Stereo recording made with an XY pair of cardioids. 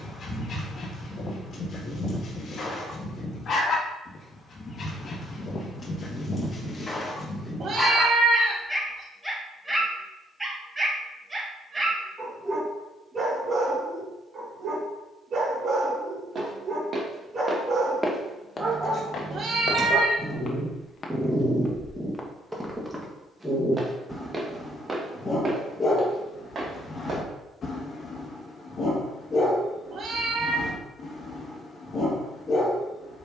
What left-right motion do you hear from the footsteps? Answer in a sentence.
In this clip you hear the footsteps go left and come back.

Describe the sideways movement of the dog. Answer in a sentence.
In this clip you hear the dog go right and come back.